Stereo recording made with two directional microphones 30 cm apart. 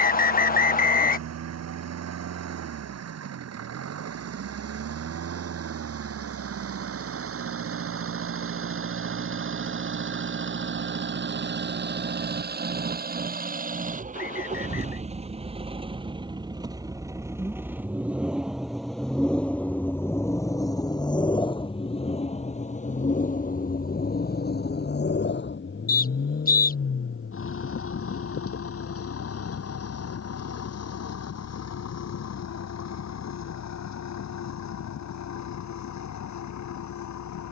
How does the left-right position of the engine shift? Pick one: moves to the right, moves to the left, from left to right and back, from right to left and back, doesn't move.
moves to the left.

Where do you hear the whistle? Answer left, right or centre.
left.